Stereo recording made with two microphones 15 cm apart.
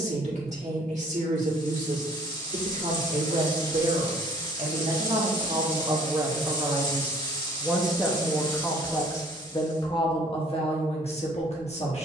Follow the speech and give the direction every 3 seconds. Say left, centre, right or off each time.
right, right, centre, left.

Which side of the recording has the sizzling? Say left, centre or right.
left.